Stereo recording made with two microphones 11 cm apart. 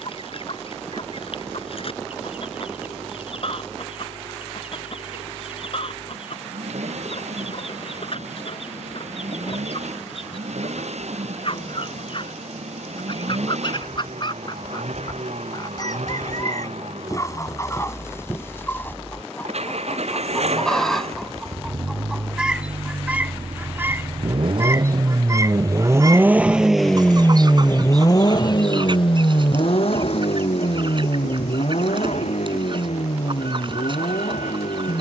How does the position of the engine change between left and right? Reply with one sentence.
In this clip you hear the engine travel towards the left.